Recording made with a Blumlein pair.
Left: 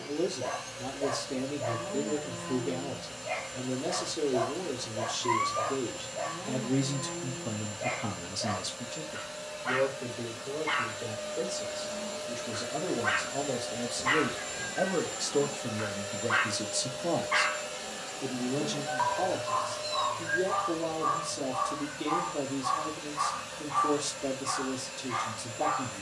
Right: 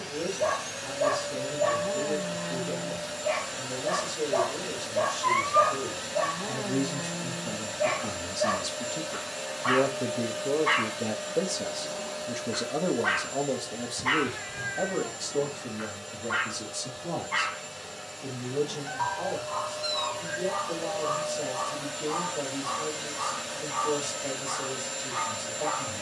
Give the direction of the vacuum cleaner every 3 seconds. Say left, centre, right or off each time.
right, right, right, right, centre, left, centre, right, right.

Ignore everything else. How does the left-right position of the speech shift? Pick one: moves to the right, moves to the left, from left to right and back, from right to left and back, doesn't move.
from left to right and back.